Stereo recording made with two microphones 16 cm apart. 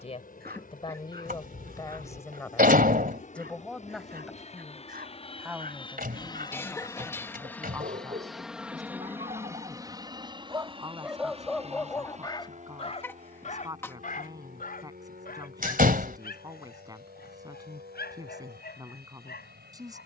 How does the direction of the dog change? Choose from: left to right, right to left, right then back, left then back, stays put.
right to left.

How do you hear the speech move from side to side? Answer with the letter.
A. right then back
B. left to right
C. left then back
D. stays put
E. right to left
B.